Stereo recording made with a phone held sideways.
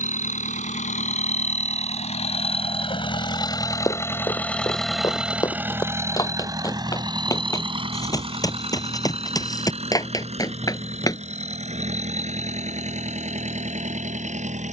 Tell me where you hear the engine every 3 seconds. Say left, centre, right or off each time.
left, centre, right, right, right.